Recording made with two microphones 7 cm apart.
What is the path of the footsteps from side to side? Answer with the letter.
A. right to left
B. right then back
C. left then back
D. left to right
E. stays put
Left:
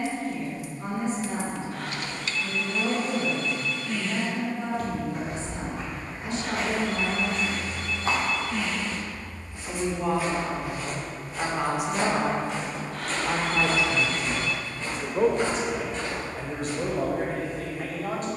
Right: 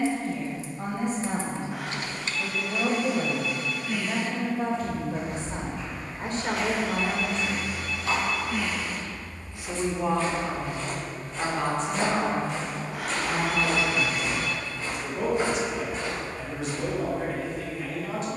D.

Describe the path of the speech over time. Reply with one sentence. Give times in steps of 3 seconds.
You can hear the speech on the right from 0 s, in the centre from 9 s and on the left from 12 s.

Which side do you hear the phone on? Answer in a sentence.
In this clip you hear the phone in the centre.